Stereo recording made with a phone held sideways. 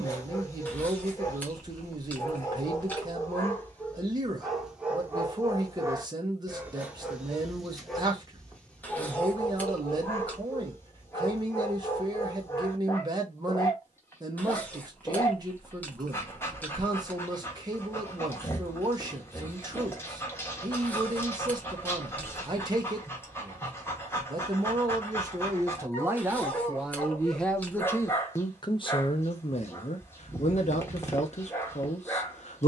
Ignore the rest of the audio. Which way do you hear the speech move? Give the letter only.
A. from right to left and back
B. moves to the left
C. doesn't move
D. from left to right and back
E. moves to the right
B.